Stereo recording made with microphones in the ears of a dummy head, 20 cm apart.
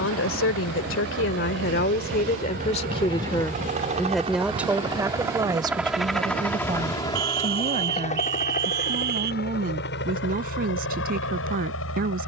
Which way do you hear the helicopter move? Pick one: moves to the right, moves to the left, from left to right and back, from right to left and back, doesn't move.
moves to the left.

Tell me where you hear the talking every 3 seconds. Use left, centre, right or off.
left, centre, right, right.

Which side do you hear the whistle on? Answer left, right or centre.
right.